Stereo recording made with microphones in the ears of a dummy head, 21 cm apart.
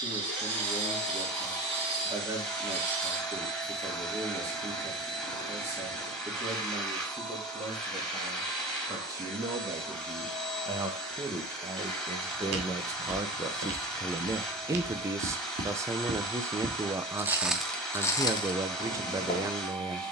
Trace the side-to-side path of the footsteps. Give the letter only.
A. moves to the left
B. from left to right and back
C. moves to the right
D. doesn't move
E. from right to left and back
A.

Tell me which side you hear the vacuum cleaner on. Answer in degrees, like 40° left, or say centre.
centre.